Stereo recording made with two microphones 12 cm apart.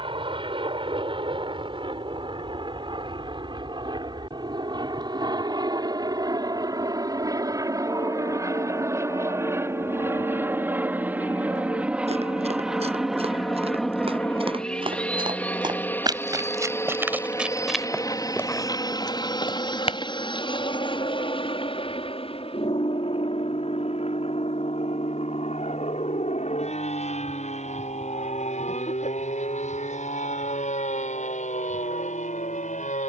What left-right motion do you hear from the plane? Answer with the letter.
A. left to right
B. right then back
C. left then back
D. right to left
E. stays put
D.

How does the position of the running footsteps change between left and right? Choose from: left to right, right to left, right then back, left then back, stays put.
right to left.